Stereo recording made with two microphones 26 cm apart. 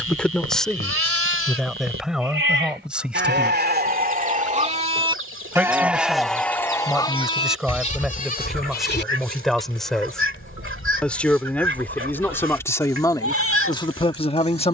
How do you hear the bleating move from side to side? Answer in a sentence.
In this clip you hear the bleating travel towards the left.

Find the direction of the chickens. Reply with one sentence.
You can hear the chickens on the right.